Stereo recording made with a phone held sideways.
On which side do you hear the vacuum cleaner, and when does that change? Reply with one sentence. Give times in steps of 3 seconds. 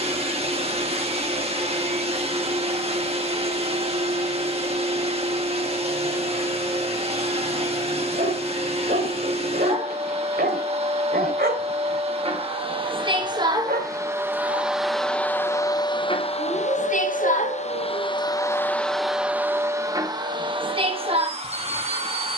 You can hear the vacuum cleaner on the right from 0 s, on the left from 15 s, in the centre from 18 s and on the right from 21 s.